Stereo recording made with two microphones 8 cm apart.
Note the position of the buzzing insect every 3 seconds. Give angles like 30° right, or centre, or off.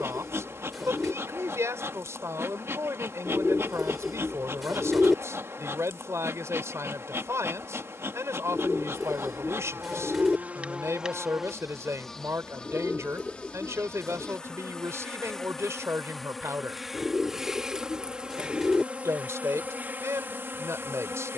30° right, 30° right, 30° right, 20° right, 10° left, centre, 20° right.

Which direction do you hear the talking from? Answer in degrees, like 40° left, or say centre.
40° right.